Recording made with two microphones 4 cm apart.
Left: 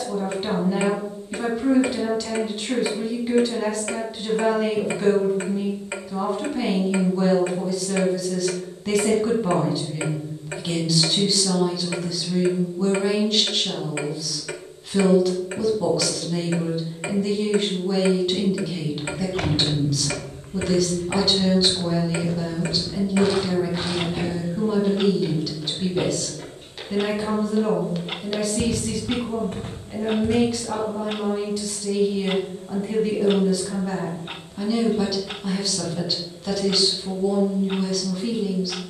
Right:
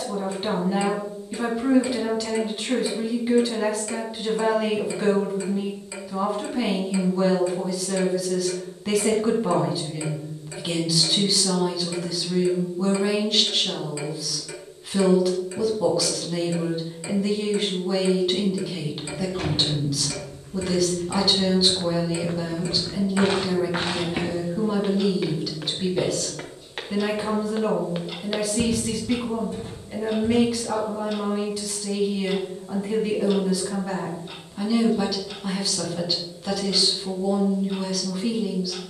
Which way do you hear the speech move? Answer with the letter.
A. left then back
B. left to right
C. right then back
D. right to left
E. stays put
E.